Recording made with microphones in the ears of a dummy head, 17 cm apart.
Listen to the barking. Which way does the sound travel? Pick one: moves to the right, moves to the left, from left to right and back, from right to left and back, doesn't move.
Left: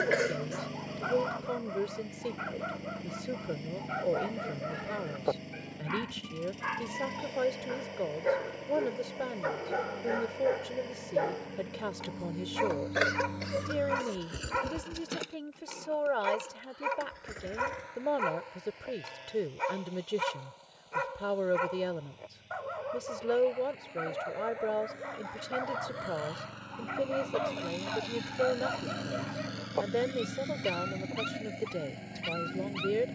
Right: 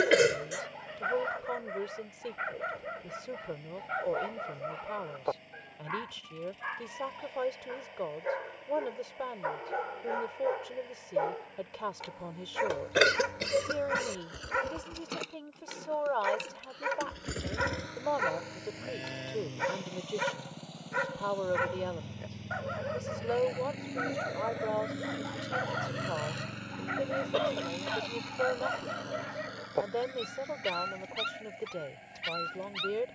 from right to left and back.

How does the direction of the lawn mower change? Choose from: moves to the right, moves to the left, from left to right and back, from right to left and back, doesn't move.
from left to right and back.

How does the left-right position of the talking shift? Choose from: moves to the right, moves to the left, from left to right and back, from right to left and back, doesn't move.
doesn't move.